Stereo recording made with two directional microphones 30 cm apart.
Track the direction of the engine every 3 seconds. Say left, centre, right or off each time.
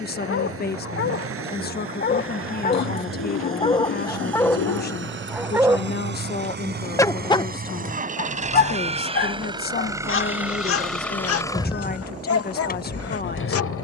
right, right, right, centre, left.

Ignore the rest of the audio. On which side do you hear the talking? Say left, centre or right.
left.